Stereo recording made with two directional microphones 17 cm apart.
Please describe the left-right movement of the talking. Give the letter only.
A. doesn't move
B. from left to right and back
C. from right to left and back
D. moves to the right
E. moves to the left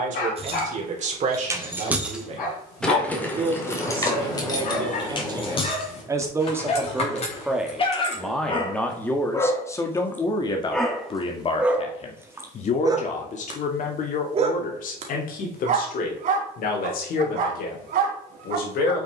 E.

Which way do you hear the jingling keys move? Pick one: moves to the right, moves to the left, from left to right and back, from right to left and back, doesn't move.
moves to the left.